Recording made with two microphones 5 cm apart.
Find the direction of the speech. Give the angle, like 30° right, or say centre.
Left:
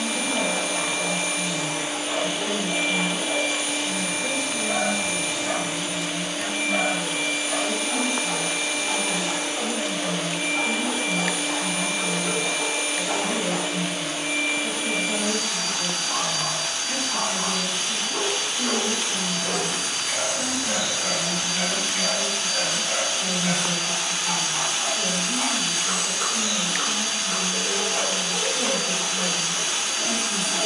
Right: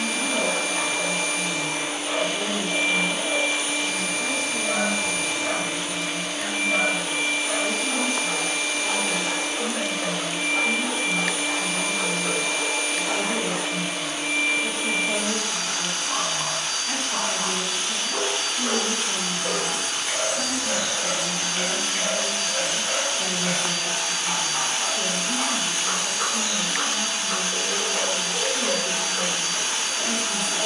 70° right.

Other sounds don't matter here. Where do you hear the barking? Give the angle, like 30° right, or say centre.
50° right.